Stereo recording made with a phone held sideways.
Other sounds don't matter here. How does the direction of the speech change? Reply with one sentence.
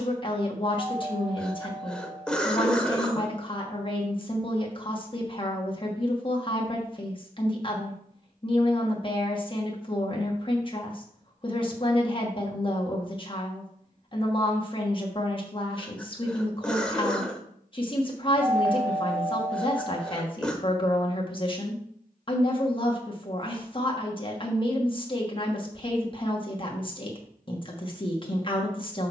You can hear the speech stay in one place.